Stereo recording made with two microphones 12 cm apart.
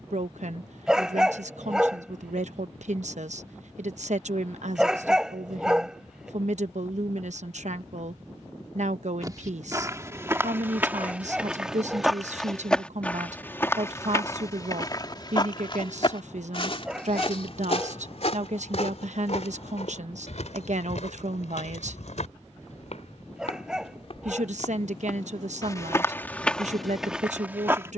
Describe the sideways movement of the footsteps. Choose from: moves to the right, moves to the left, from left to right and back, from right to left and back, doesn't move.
from right to left and back.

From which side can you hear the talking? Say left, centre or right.
right.